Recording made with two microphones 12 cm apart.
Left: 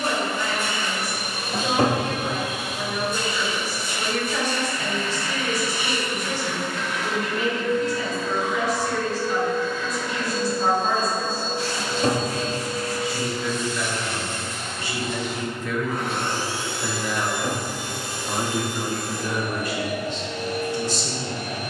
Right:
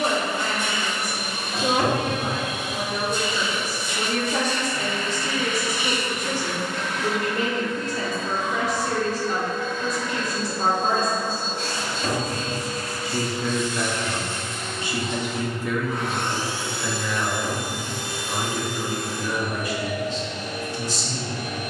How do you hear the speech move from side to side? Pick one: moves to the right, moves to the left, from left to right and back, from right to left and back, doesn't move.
moves to the left.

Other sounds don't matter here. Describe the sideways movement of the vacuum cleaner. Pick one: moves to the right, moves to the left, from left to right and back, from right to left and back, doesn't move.
doesn't move.